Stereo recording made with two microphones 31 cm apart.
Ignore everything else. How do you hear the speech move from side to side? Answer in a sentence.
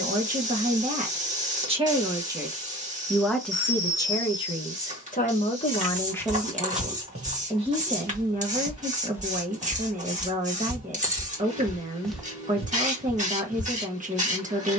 In this clip you hear the speech go left and come back.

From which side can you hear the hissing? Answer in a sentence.
You can hear the hissing on the right.